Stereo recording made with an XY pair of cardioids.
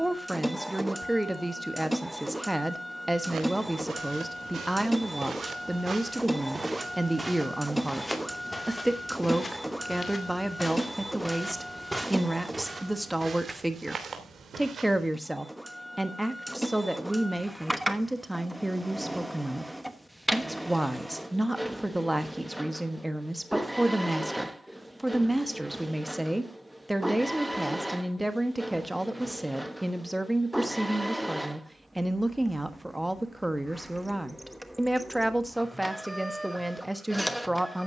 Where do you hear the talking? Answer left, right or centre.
centre.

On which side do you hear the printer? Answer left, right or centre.
centre.